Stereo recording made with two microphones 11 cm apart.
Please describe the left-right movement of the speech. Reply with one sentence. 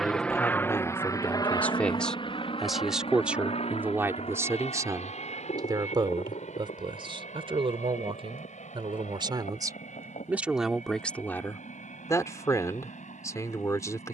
In this clip you hear the speech go right and come back.